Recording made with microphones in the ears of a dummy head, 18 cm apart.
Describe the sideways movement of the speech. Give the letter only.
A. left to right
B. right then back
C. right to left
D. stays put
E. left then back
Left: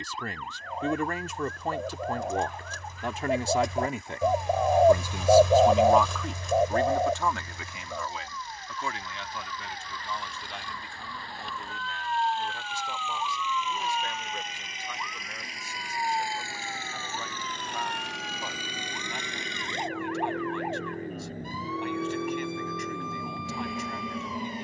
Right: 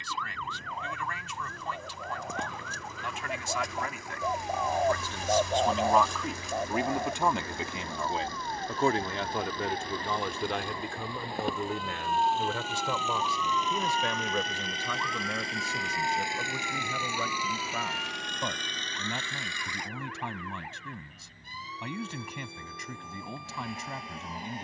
A.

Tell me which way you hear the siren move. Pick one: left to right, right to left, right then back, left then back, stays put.
right to left.